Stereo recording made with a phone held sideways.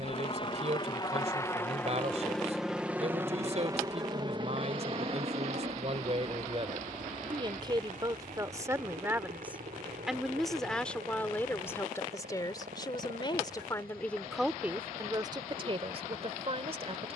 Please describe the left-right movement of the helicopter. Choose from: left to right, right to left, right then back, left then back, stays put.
left to right.